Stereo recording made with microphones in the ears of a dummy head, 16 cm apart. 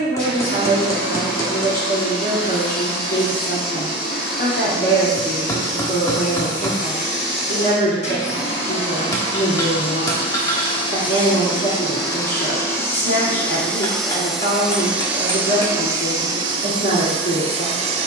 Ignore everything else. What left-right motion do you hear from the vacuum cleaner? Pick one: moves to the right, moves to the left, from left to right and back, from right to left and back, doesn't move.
moves to the right.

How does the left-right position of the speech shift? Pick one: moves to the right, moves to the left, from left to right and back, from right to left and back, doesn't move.
doesn't move.